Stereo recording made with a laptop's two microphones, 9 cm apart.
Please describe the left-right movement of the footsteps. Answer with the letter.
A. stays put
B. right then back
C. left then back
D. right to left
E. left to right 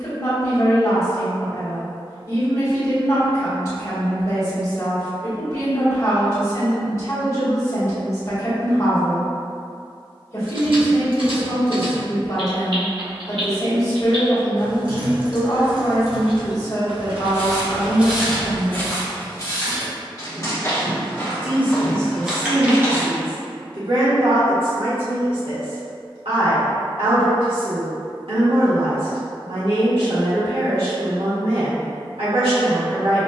C.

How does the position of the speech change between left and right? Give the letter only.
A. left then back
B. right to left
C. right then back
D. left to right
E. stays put
D.